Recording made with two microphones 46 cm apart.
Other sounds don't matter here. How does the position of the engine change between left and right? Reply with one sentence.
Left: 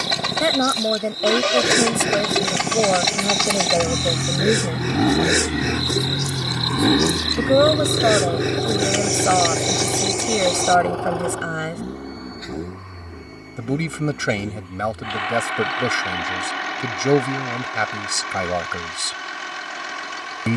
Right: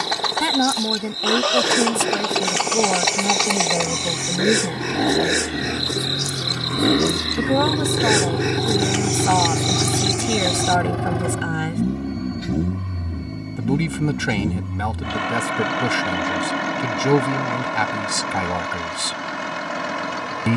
You can hear the engine travel towards the right.